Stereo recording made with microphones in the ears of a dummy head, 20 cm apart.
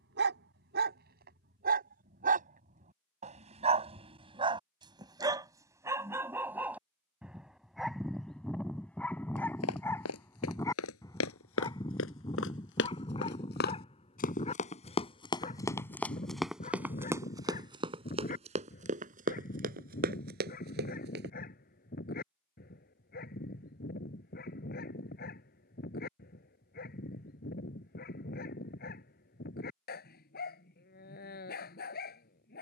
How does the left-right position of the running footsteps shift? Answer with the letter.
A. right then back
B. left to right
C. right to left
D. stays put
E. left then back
B.